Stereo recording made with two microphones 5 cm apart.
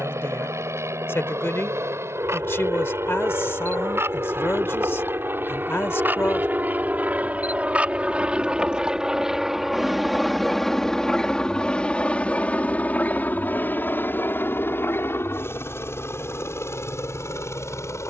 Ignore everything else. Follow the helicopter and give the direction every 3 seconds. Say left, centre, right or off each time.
right, right, right, centre, left, left.